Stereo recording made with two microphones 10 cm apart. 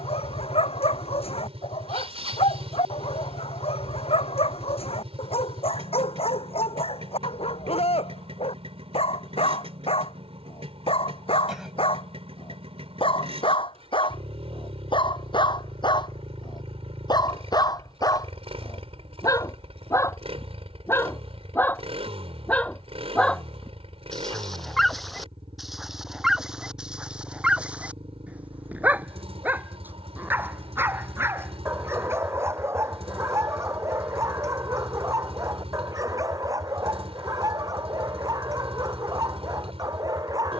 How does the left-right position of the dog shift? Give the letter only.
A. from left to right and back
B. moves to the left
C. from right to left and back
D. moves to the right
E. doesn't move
D.